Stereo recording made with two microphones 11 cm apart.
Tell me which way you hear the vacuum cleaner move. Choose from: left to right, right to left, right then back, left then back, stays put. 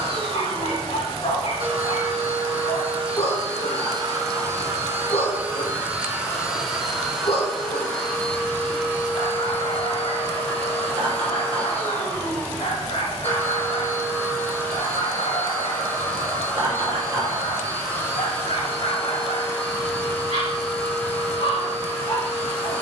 right to left.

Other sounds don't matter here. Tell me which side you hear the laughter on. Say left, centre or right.
right.